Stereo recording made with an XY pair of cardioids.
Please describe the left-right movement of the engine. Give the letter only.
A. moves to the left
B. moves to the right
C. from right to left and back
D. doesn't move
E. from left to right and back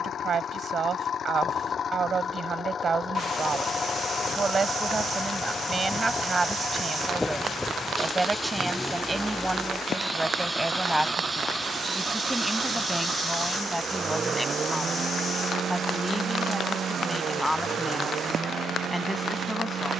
B.